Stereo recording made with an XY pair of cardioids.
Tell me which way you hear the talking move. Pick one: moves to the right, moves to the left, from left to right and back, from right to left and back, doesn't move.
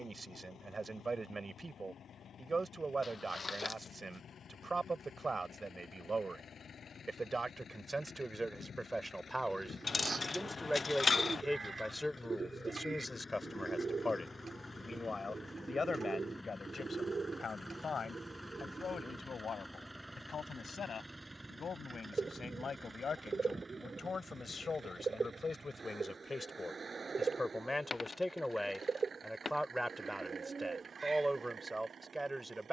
from right to left and back.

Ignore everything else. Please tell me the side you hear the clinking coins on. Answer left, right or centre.
left.